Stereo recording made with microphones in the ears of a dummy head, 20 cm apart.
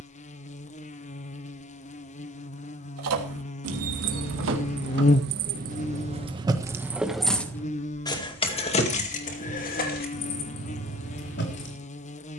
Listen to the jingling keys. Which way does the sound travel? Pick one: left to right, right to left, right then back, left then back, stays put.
right to left.